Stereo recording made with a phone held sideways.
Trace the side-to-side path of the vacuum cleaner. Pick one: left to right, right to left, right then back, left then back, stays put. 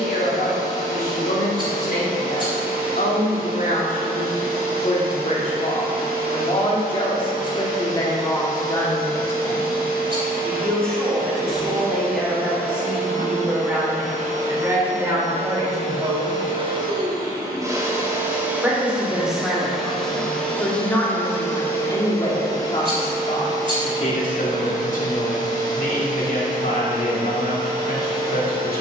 right to left.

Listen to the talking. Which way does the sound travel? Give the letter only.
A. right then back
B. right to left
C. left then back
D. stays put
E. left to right
A.